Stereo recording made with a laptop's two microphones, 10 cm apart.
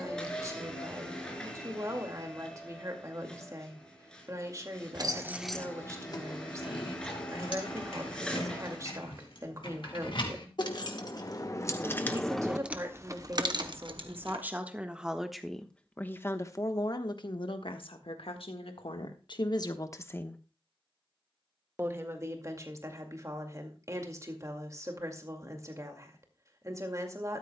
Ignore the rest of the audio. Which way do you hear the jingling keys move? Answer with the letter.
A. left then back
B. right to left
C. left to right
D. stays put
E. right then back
A.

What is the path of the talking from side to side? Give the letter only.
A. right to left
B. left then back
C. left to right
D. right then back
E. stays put
B.